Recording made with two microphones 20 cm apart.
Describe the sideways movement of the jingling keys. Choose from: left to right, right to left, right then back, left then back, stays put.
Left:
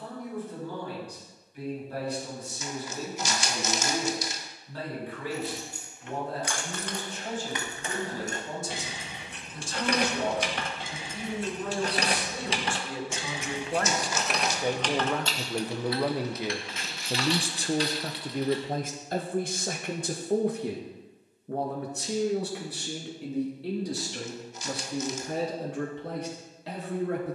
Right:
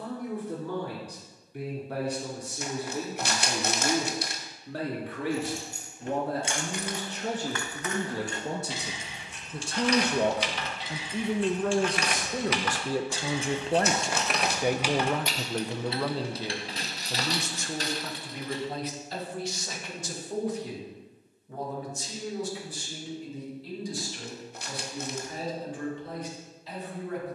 left then back.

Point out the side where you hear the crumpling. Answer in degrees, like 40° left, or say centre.
60° right.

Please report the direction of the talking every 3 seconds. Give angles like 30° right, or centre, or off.
80° right, 70° right, 70° right, 50° right, 30° right, 20° left, 50° left, 70° left, 70° left.